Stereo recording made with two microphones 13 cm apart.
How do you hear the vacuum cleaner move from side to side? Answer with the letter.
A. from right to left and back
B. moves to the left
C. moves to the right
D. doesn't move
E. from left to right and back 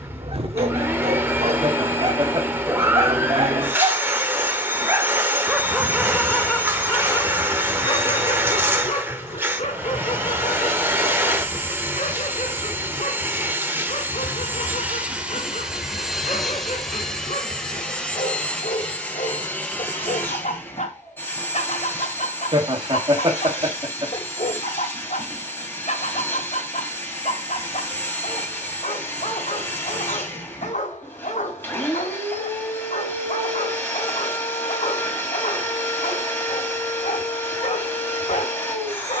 B.